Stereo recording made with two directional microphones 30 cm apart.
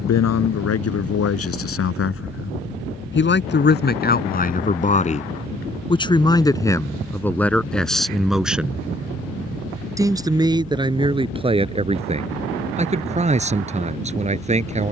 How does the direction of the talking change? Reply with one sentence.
In this clip you hear the talking travel towards the right.